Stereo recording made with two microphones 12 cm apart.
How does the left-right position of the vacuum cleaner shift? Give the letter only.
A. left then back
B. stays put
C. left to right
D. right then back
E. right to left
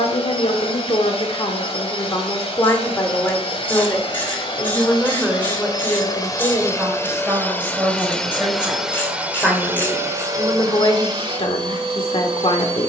C.